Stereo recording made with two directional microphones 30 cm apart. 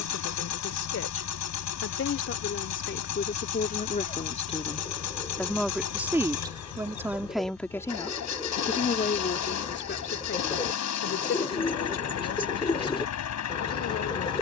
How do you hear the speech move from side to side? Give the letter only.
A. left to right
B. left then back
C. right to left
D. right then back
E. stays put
D.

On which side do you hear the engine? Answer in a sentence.
In this clip you hear the engine on the left.